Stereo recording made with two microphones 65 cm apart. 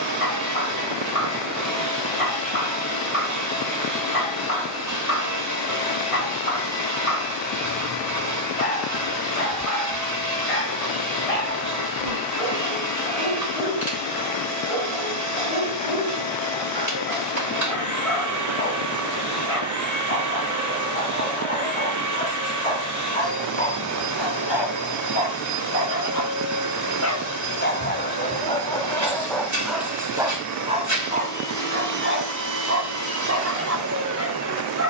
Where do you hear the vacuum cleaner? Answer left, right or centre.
right.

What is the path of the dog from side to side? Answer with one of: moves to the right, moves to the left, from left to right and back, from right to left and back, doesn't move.
moves to the right.